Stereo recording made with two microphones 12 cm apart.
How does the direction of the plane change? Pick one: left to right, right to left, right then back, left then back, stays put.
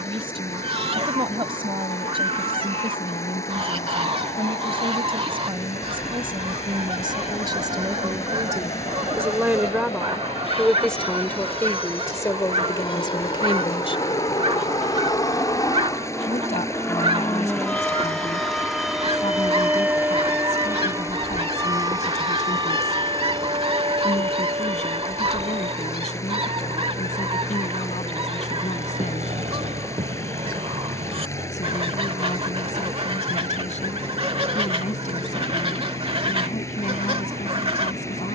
left to right.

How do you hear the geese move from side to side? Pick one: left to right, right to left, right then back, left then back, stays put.
stays put.